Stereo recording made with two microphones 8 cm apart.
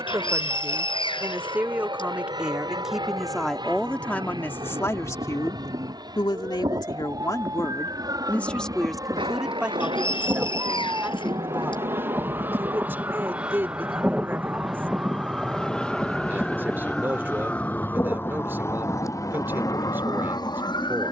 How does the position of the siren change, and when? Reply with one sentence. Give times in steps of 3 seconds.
You can hear the siren on the right from 0 s, in the centre from 15 s and on the left from 18 s.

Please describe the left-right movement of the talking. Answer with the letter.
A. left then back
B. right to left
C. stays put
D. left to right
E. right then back
A.